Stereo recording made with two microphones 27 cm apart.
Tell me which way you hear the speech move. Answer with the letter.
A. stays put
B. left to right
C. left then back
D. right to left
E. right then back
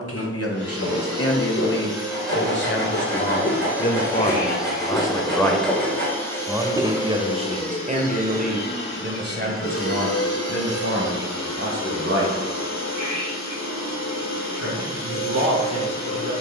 B.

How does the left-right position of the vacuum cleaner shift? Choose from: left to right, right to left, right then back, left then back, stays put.
right to left.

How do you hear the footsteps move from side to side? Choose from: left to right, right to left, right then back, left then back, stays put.
left to right.